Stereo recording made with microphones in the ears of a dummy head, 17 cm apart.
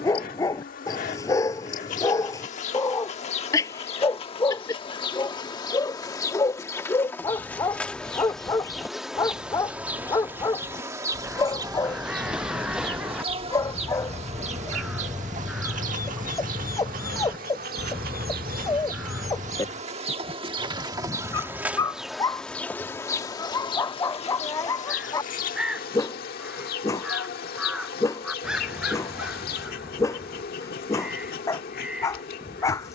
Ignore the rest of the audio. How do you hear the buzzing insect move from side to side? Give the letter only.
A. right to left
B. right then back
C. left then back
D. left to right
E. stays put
B.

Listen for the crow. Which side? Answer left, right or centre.
centre.